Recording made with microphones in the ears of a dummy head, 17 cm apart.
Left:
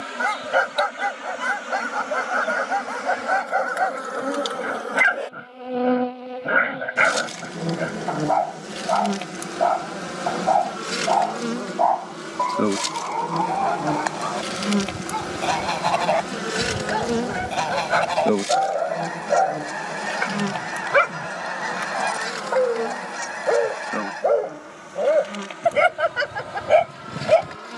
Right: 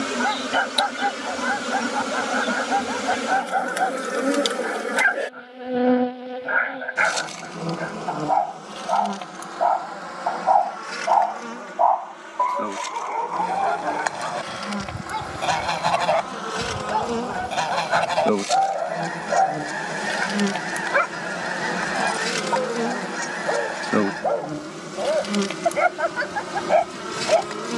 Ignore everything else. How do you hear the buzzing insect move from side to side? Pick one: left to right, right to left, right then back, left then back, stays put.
left then back.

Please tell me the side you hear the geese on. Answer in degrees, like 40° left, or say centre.
centre.